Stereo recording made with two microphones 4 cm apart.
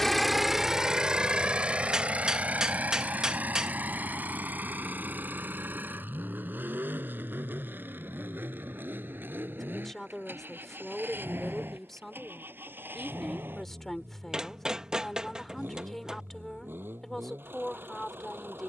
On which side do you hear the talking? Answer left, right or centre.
centre.